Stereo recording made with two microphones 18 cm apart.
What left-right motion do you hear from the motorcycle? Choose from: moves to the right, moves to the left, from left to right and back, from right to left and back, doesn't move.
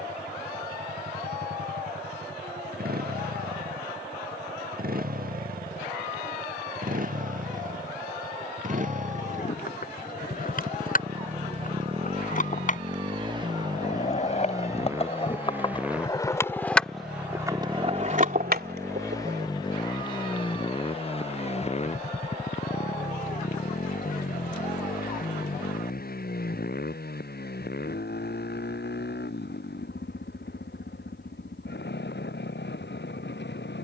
moves to the left.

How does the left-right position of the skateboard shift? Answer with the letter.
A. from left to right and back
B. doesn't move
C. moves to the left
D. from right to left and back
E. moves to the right
E.